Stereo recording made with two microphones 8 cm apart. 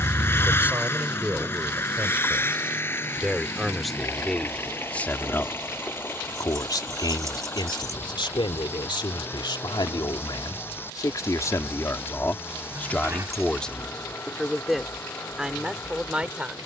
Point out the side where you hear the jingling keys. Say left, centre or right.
right.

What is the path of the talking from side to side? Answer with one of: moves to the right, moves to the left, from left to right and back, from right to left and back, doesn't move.
from right to left and back.